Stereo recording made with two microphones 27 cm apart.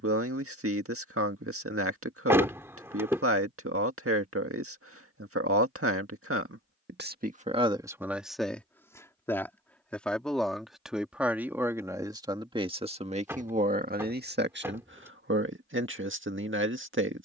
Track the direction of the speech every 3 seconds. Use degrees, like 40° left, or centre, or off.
60° right, 60° right, 20° right, centre, 30° right, 50° right.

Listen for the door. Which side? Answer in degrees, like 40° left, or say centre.
10° right.